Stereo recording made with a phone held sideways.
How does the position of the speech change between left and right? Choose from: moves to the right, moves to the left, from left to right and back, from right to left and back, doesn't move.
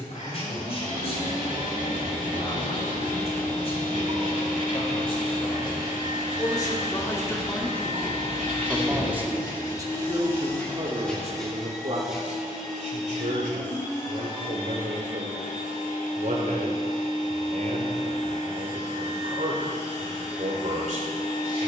moves to the right.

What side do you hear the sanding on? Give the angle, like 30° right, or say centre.
80° right.